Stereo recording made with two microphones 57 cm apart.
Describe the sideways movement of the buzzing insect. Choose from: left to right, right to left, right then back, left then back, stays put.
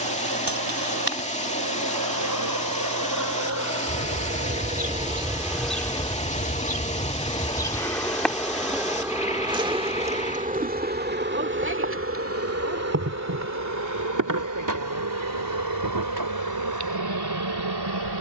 left then back.